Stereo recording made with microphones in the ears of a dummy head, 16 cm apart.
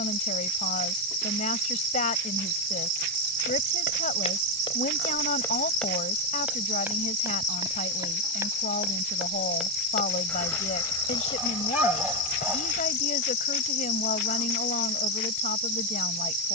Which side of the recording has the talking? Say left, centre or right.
left.